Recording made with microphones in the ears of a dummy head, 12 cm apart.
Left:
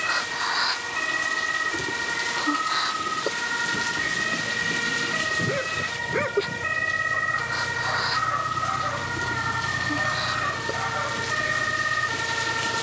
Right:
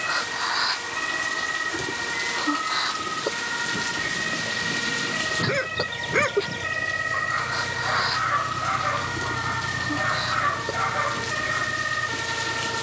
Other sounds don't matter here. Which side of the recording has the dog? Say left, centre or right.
right.